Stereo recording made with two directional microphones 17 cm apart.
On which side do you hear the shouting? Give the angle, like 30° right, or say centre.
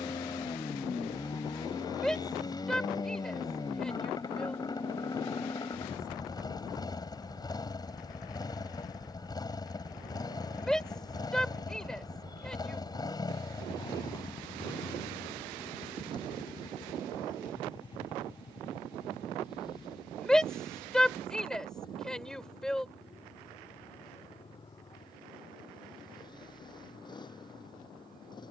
centre.